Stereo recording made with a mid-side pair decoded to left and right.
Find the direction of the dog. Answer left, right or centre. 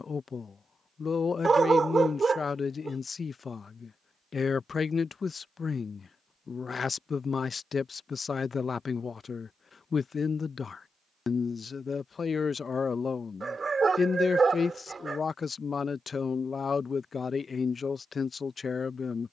right.